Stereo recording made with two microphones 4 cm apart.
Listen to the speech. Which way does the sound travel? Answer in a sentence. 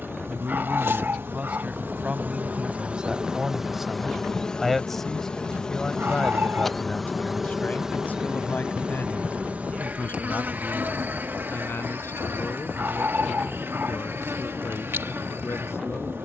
You can hear the speech go from the right side to the left.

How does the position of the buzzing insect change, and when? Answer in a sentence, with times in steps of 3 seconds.
In this clip you hear the buzzing insect on the right from 0 s, in the centre from 3 s and on the right from 9 s.